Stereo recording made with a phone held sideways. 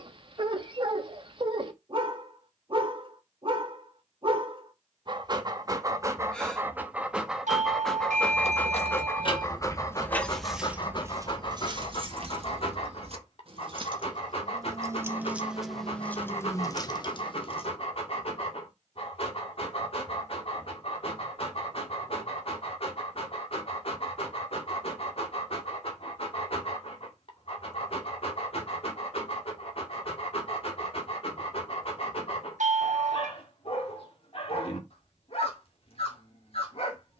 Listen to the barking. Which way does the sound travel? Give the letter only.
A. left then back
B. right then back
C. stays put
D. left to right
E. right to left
E.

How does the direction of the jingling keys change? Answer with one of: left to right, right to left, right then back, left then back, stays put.
right then back.